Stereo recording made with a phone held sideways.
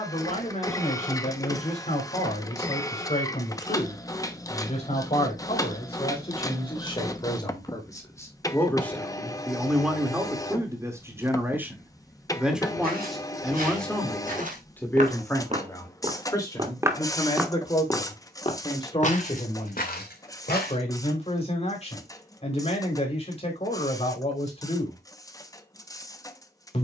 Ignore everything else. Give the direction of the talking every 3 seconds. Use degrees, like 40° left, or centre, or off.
40° left, 40° left, 20° left, 10° right, centre, 20° left, 30° left, 40° left, 40° left.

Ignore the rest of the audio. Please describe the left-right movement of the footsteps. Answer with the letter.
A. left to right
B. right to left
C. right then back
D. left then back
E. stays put
B.